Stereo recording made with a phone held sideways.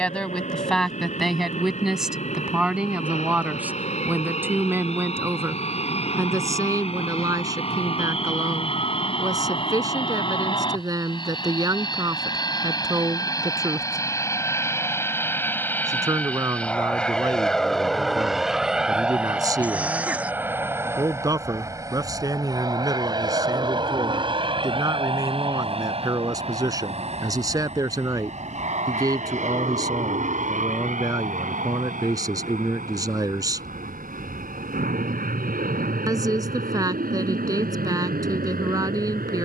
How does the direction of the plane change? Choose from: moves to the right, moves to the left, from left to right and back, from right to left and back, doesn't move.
moves to the right.